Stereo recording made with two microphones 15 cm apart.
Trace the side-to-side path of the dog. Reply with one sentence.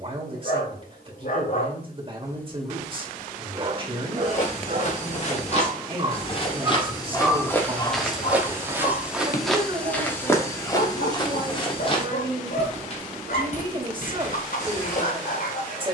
You can hear the dog move from left to right and back again.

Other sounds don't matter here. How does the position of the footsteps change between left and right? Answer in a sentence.
You can hear the footsteps go right and come back.